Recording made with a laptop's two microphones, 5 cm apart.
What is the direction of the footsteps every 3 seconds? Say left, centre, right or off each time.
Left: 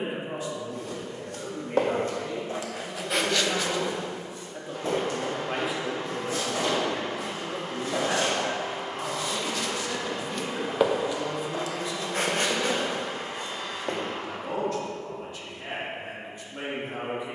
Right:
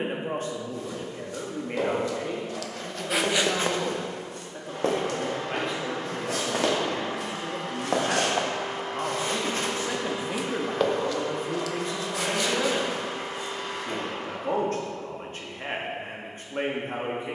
left, right, right, centre, left, off.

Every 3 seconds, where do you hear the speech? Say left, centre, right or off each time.
right, centre, centre, right, right, right.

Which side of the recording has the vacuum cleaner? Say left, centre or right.
right.